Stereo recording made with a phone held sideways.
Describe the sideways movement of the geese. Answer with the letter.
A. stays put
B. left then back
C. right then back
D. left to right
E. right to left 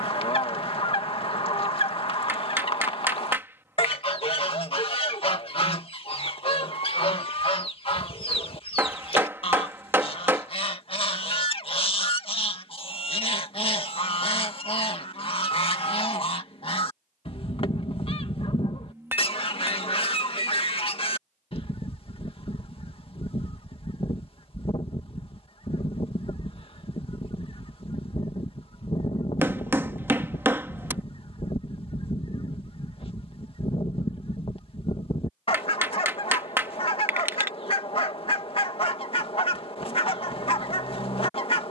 A.